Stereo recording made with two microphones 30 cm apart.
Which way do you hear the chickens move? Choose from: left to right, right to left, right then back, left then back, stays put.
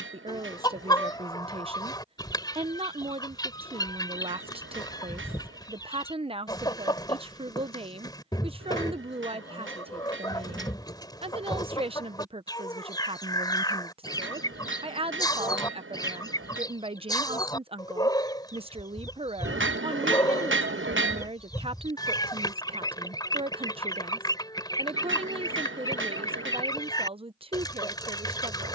stays put.